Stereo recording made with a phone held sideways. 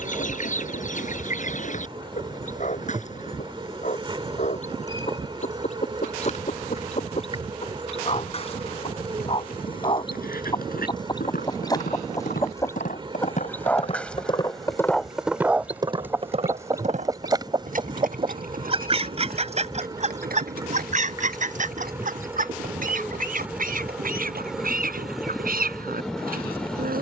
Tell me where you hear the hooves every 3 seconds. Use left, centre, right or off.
off, off, off, left, left, right, right, right, right.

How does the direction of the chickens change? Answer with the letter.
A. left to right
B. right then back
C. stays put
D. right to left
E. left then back
A.